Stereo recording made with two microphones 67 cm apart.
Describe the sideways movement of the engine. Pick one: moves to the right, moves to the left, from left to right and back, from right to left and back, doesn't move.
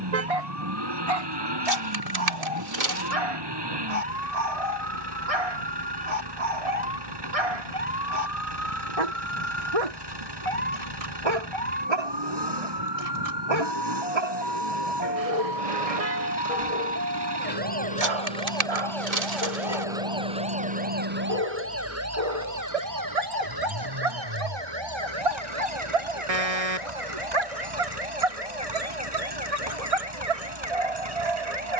doesn't move.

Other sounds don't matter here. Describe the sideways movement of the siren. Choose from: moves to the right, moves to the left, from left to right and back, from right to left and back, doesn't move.
moves to the right.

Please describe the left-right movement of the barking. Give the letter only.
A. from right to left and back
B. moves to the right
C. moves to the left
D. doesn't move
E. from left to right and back
D.